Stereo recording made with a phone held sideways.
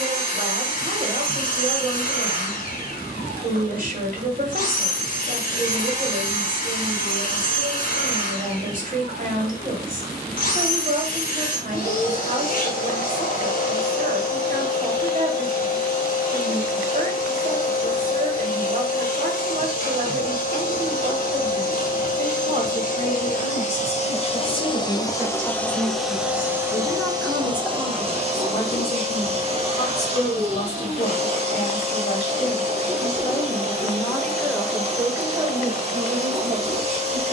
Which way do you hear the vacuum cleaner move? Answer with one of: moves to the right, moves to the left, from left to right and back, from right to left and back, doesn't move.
moves to the right.